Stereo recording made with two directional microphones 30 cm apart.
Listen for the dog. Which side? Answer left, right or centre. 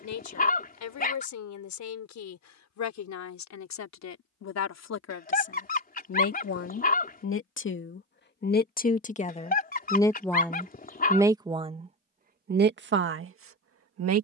left.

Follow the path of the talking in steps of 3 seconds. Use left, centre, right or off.
left, left, left, centre, right.